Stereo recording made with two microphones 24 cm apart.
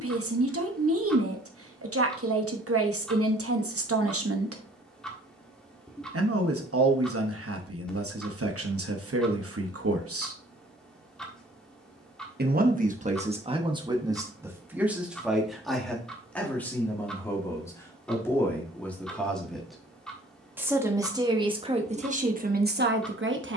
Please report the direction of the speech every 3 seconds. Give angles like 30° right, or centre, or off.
70° right, 70° right, 70° right, 70° right, 20° right, 10° left, centre, 30° right.